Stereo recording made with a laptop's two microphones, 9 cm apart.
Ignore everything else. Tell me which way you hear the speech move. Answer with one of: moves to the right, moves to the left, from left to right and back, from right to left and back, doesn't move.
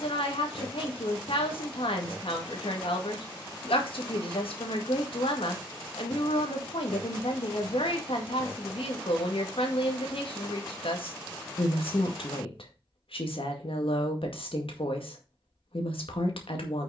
doesn't move.